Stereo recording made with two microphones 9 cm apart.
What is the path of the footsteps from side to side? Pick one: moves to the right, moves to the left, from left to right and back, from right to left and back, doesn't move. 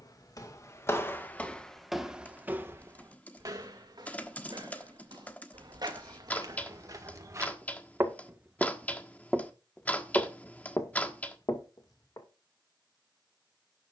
from left to right and back.